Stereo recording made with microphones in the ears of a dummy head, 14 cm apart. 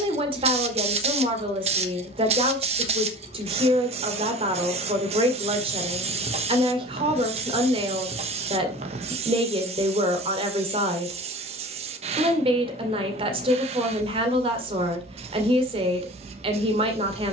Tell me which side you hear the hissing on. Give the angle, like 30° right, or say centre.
40° right.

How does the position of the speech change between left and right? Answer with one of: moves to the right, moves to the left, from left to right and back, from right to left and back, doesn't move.
doesn't move.